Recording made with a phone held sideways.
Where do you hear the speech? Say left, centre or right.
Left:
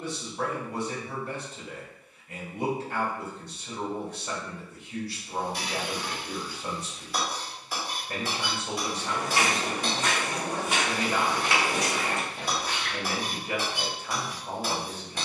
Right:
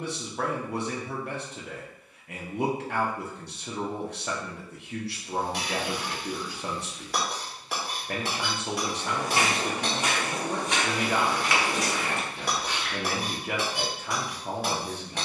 right.